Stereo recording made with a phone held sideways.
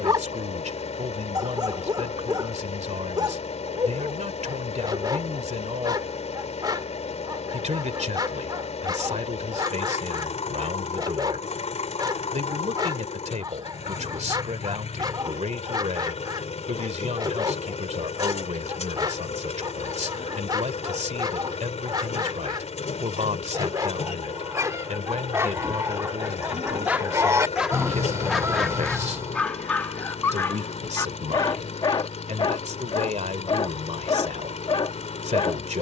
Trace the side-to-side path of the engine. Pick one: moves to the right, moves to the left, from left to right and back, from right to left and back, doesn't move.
doesn't move.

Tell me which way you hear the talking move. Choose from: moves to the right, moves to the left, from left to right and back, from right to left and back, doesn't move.
doesn't move.